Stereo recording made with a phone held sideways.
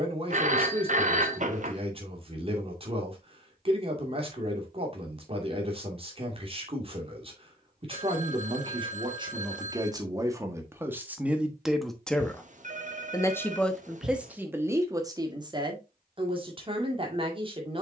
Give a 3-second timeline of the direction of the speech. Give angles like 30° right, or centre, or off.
40° right, 40° right, 30° right, 20° right, centre, 30° right.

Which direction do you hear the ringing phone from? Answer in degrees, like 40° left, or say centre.
50° right.